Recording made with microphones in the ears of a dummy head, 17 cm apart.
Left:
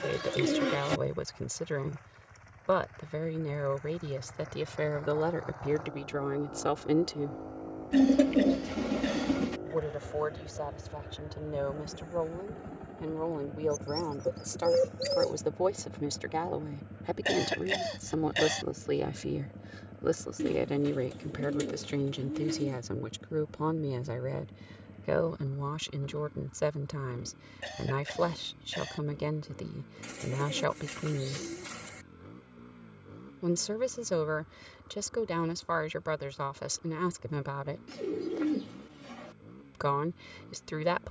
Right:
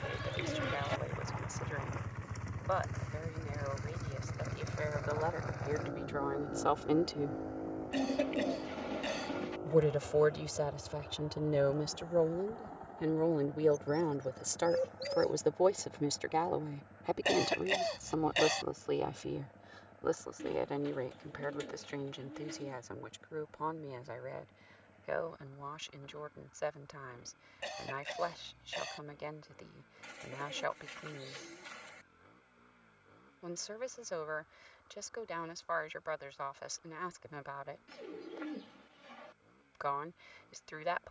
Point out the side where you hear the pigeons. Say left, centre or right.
left.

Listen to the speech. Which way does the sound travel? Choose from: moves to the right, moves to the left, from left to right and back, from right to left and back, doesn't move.
from left to right and back.